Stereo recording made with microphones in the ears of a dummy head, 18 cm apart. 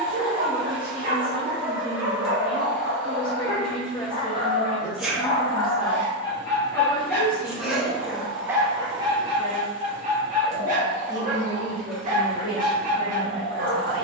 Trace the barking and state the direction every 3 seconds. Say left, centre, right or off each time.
right, left, centre, right, right.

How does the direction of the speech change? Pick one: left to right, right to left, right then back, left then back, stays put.
stays put.